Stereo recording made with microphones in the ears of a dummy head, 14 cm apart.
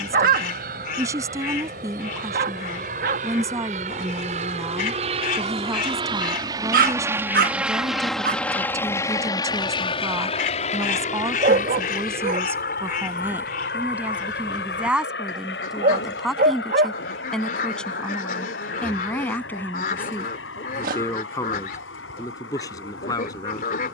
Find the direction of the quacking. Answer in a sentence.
In this clip you hear the quacking on the left.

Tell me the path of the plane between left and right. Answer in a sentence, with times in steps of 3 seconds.
You can hear the plane on the right from 0 s, in the centre from 6 s and on the left from 9 s.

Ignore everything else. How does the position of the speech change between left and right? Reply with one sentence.
In this clip you hear the speech go from the right side to the left.